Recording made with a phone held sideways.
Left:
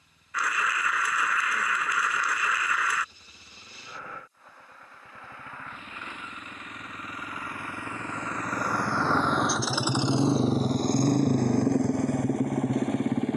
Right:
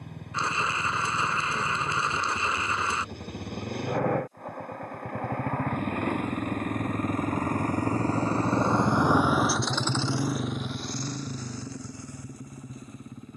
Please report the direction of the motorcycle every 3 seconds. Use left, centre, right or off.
right, right, right, left, left.